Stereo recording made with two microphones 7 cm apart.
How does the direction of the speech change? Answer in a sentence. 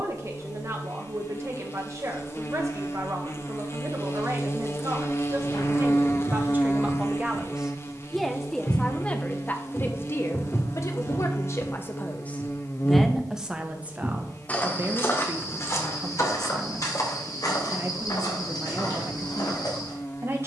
In this clip you hear the speech move from right to left and back again.